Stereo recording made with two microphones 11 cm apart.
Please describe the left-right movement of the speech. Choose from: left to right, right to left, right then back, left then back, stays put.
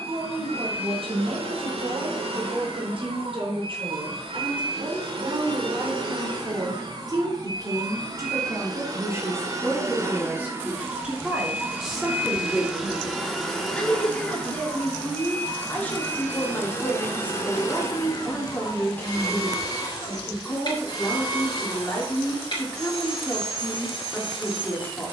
right to left.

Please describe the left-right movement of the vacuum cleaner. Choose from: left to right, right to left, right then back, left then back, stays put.
right to left.